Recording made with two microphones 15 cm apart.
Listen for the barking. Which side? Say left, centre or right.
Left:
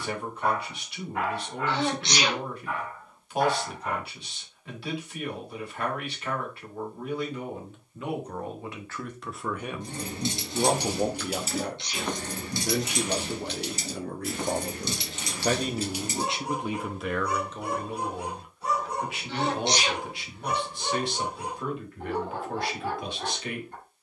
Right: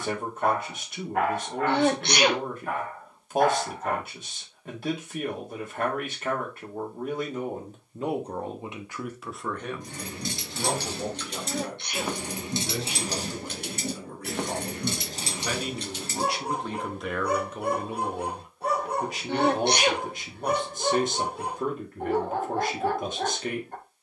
right.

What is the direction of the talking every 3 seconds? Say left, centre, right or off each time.
right, right, right, left, left, centre, right, right.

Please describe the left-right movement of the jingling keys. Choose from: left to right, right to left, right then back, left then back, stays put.
right then back.